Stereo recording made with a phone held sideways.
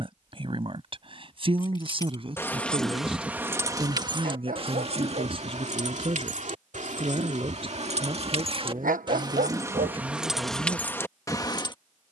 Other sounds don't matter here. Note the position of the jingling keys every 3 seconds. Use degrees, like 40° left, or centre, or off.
20° left, 40° right, 50° right, centre.